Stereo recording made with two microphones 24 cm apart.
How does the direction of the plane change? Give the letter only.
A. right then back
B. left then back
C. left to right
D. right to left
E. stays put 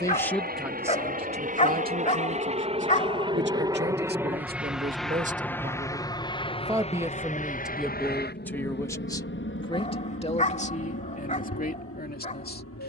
D.